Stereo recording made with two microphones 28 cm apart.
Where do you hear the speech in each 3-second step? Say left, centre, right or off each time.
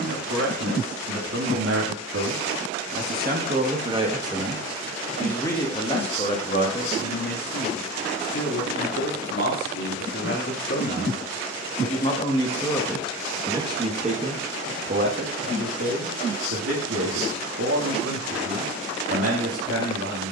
right, centre, left, left, centre, right, right.